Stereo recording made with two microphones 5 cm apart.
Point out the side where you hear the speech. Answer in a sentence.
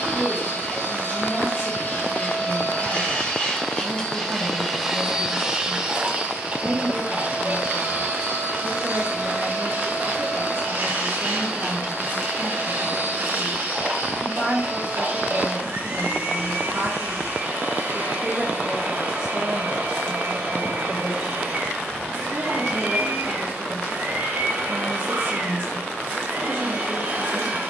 In this clip you hear the speech on the right.